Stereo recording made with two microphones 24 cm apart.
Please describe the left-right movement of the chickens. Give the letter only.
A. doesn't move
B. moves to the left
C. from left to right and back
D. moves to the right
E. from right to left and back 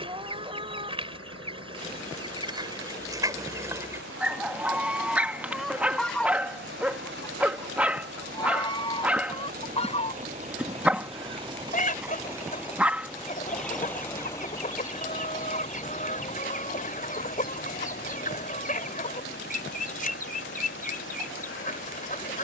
B.